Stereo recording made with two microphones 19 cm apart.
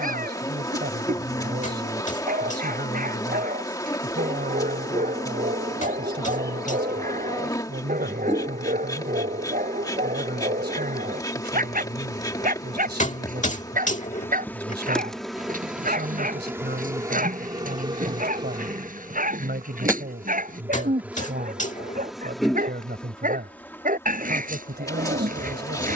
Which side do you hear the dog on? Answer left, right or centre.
right.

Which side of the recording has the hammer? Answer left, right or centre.
left.